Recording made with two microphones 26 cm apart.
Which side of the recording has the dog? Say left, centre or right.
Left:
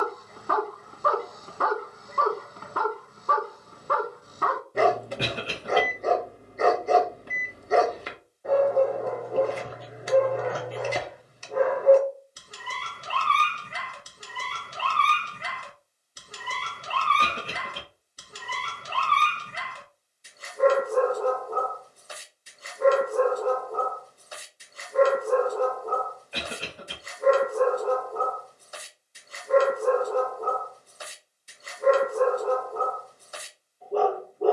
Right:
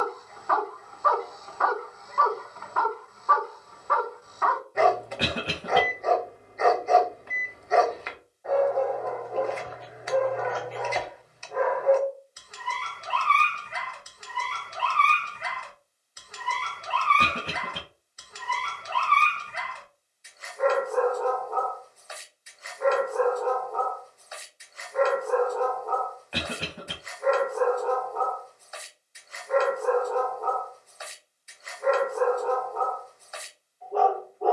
left.